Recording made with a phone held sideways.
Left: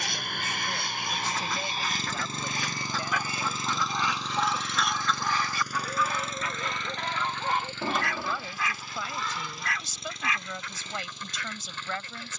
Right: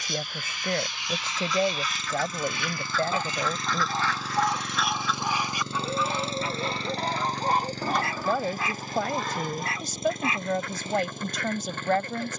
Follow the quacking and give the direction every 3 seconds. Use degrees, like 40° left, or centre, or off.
60° left, 10° left, 40° right, 60° right.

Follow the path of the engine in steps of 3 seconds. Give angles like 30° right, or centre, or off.
40° left, 10° right, 40° right, 50° right.